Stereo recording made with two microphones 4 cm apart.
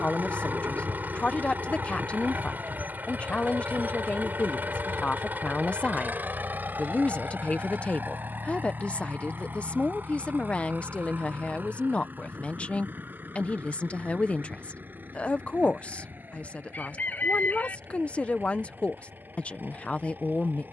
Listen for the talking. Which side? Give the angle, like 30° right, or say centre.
30° left.